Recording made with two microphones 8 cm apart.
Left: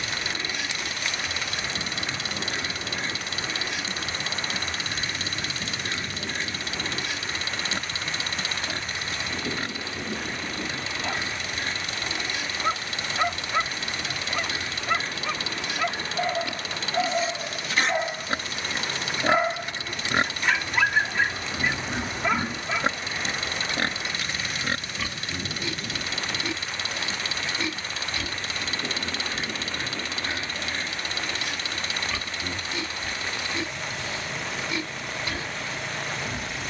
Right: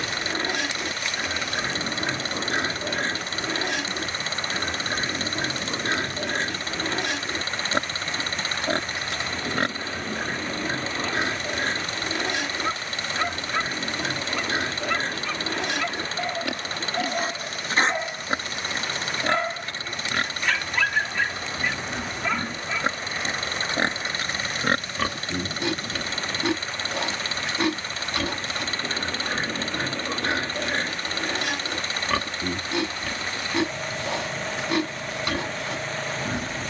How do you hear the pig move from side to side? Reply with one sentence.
In this clip you hear the pig go left and come back.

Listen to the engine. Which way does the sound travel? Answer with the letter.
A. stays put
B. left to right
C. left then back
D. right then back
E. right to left
A.